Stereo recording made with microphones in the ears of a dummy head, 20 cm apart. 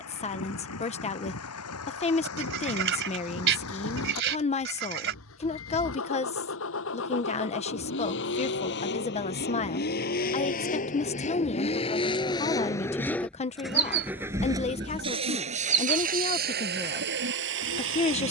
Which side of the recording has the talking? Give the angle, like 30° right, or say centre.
30° left.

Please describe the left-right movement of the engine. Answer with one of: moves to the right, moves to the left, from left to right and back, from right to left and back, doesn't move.
moves to the right.